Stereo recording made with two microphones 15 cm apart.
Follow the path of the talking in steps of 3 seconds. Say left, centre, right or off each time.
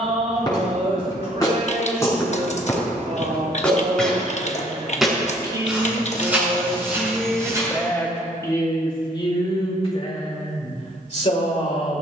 right, right, centre, left.